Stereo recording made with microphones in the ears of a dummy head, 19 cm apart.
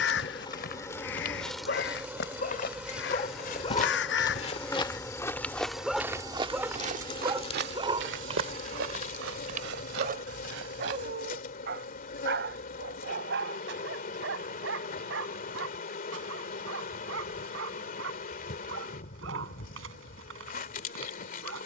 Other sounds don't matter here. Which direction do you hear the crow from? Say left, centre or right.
left.